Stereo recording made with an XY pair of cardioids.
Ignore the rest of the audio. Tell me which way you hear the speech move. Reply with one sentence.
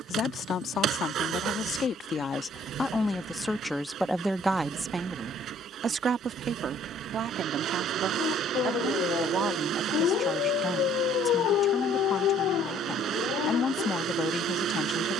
In this clip you hear the speech go right and come back.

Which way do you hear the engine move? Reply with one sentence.
You can hear the engine stay put.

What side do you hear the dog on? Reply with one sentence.
You can hear the dog on the left.